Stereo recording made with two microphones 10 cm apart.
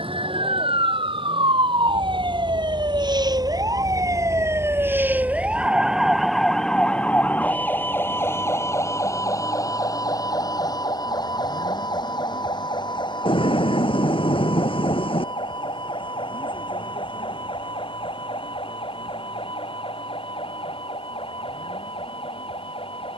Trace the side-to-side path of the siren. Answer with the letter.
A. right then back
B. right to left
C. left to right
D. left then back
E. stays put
B.